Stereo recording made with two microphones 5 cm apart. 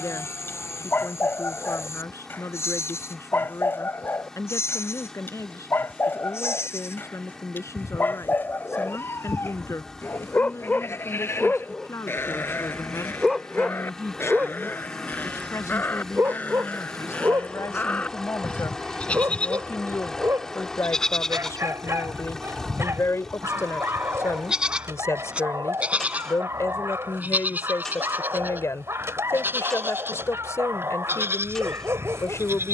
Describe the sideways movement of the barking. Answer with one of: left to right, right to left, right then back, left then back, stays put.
left to right.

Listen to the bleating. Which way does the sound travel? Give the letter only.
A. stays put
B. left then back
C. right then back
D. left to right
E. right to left
D.